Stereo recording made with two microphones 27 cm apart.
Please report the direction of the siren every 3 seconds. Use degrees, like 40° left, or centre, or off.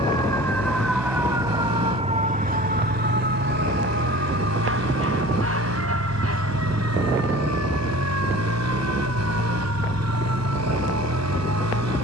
10° right, 40° right, 60° right, 60° right.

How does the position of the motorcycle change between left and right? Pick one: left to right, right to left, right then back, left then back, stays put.
stays put.